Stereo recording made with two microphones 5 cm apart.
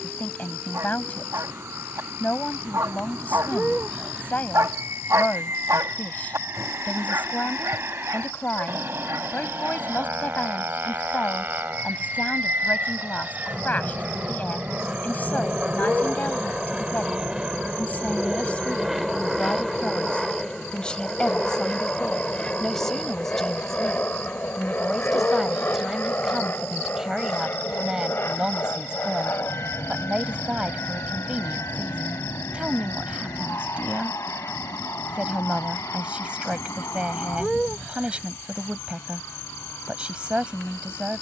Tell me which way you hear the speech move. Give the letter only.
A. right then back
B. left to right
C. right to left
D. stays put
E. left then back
B.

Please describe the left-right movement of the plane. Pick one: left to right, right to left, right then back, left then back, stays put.
right to left.